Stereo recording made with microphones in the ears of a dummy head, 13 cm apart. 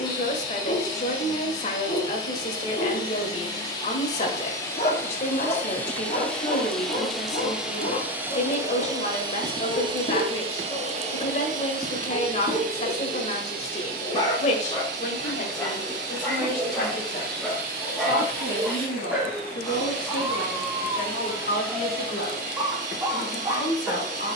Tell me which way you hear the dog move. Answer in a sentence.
You can hear the dog move to the right.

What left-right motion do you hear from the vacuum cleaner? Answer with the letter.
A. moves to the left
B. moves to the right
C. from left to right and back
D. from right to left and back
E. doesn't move
B.